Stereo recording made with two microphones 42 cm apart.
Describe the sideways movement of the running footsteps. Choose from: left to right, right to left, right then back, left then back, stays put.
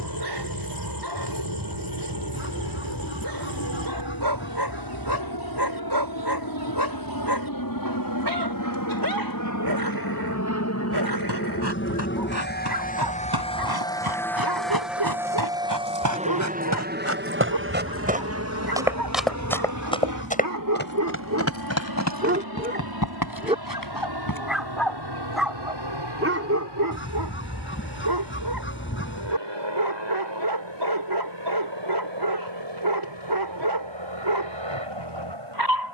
right to left.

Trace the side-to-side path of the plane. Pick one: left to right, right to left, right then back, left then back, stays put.
left to right.